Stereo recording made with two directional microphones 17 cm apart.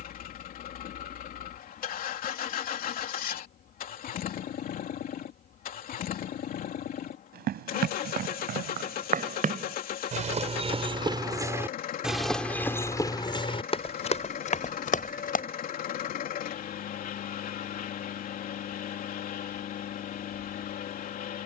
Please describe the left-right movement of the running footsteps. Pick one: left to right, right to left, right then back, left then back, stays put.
right to left.